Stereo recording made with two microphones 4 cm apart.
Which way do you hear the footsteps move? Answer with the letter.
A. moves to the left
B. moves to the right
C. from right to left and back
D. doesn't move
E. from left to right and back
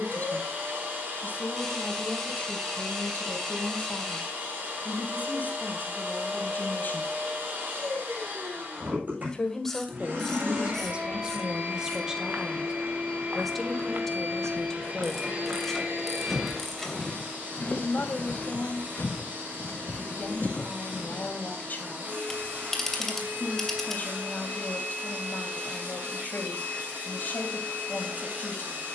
A.